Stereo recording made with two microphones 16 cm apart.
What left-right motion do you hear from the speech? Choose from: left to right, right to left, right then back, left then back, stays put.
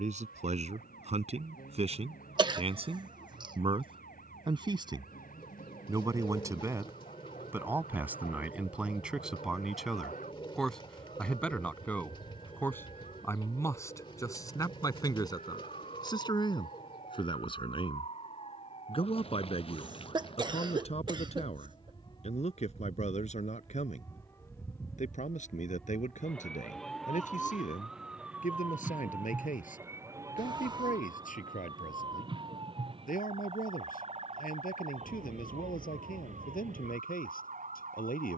right to left.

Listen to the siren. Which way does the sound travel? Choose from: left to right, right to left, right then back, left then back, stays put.
left to right.